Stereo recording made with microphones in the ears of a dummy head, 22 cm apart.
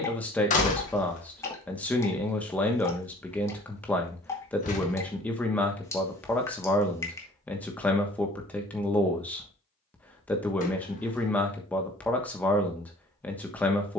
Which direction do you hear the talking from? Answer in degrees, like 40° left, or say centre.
10° left.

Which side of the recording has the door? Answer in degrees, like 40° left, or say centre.
30° left.